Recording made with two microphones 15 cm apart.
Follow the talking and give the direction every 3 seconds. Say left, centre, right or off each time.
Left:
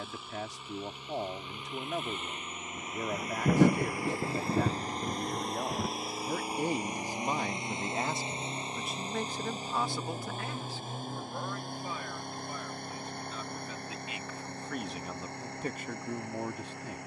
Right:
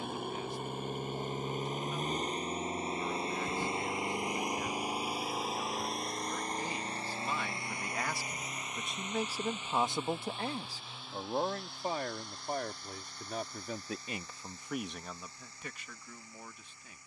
left, left, left, right, right, left.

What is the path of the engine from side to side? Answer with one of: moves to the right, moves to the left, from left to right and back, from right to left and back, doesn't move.
moves to the left.